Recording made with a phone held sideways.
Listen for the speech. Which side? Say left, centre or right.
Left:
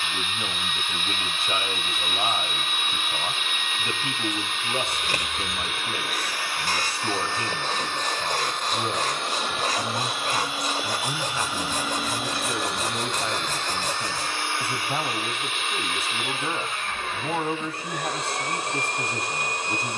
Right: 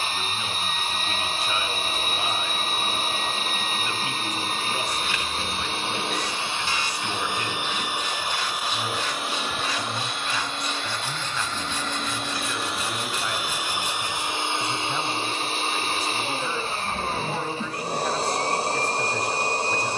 left.